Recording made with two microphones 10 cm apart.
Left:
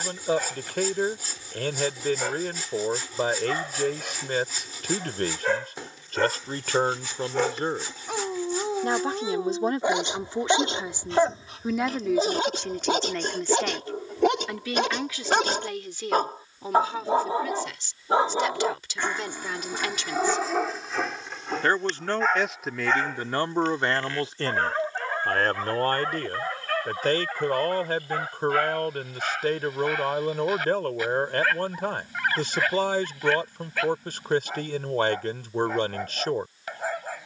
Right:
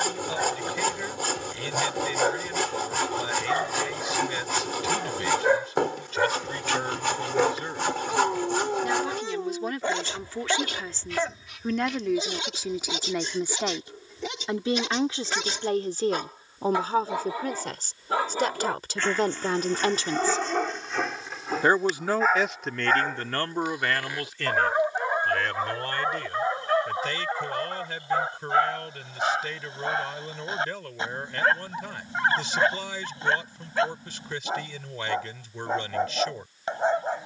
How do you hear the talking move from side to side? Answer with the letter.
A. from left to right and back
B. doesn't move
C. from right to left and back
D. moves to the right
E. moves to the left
A.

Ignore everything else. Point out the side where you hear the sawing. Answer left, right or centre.
right.